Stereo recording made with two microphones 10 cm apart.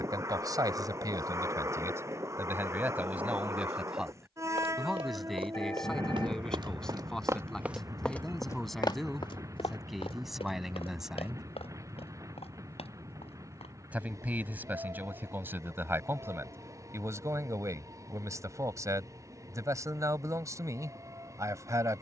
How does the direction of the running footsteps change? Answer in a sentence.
In this clip you hear the running footsteps move from right to left.